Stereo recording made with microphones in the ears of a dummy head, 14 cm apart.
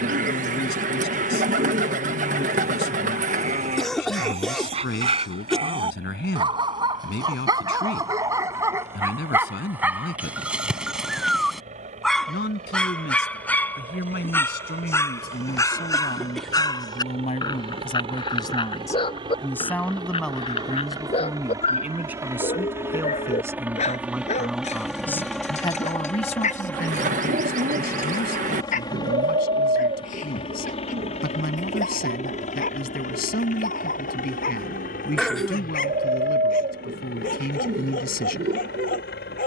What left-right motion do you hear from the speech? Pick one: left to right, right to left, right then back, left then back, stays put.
right then back.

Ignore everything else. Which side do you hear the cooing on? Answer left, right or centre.
right.